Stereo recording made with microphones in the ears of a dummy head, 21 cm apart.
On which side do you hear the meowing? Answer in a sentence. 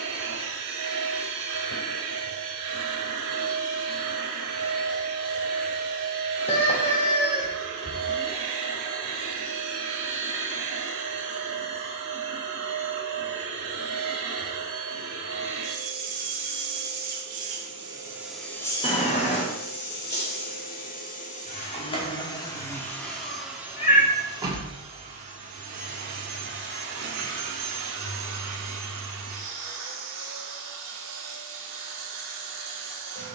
In this clip you hear the meowing on the left.